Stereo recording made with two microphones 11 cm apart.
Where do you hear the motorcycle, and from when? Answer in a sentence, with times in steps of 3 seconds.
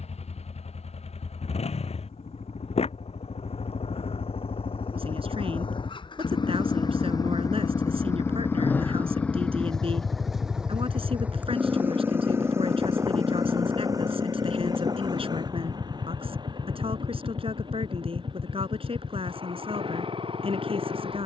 In this clip you hear the motorcycle on the left from 0 s, in the centre from 9 s and on the right from 12 s.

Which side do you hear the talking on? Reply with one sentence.
You can hear the talking on the right.